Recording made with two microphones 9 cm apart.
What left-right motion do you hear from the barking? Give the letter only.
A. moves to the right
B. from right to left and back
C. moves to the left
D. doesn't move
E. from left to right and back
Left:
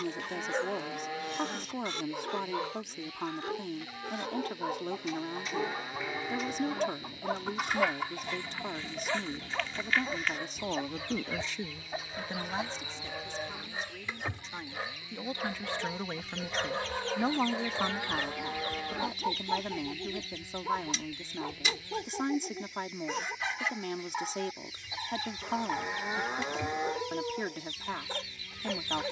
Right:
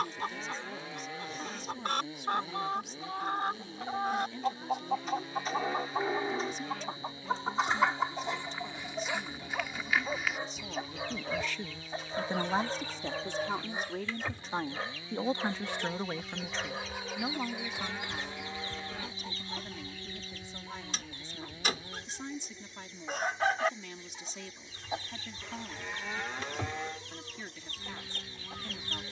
E.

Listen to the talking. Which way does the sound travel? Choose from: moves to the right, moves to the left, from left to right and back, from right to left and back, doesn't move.
from left to right and back.